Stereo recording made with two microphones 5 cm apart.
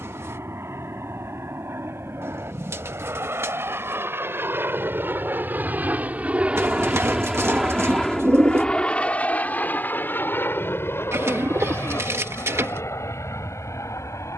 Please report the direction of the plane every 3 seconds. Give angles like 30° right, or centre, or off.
70° right, 50° right, 10° right, 40° left, 60° left.